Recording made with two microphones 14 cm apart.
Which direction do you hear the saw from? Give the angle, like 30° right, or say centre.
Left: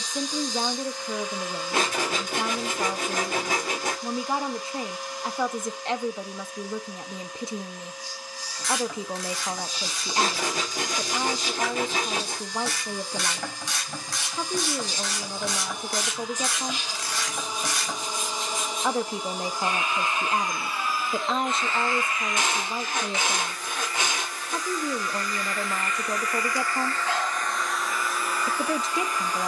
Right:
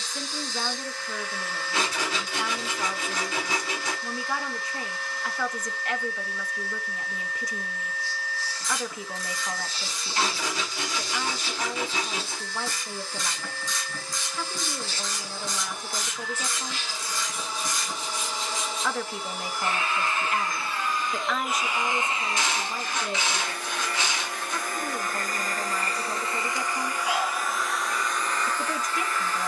50° left.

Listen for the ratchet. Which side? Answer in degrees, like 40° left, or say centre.
70° left.